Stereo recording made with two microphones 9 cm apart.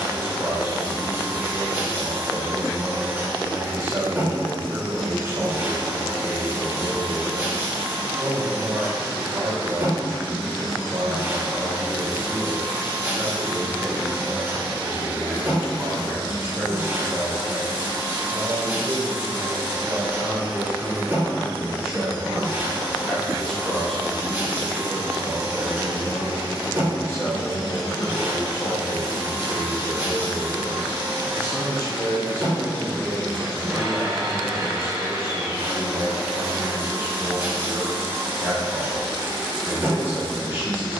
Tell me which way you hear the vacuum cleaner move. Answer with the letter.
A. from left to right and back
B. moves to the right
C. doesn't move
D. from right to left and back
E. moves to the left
C.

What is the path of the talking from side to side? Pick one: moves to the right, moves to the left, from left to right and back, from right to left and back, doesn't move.
from right to left and back.